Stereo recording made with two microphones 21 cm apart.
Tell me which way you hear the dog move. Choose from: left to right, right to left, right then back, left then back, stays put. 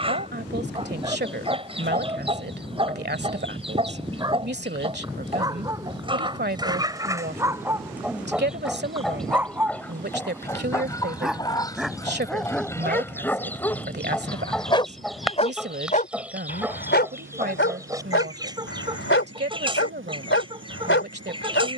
right to left.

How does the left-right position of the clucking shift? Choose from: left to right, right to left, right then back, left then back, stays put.
left then back.